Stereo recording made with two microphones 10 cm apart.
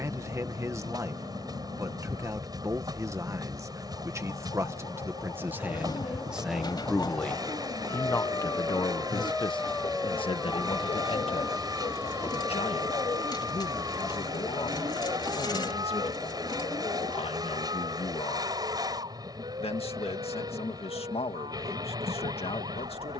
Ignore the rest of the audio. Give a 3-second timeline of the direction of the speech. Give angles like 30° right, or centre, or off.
30° right, 30° right, 20° left, 60° left, 80° left, 80° left, 80° left, 80° left.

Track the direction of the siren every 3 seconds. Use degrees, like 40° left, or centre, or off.
60° left, 50° left, 30° left, centre, 30° right, 40° right, 60° right, 60° right.